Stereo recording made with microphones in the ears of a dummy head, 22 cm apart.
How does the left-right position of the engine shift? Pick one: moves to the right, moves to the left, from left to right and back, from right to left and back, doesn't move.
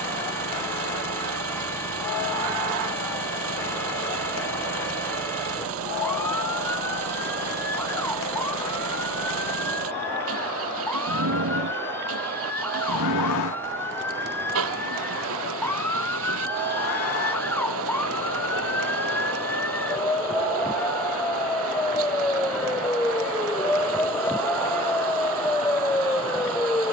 doesn't move.